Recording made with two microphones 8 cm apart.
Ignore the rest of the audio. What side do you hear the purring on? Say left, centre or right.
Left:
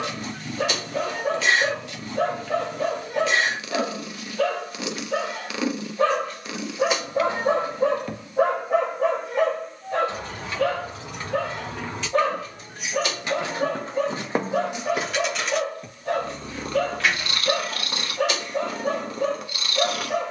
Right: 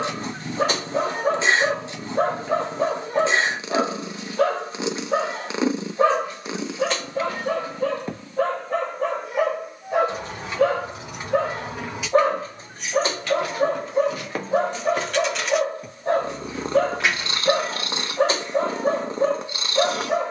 right.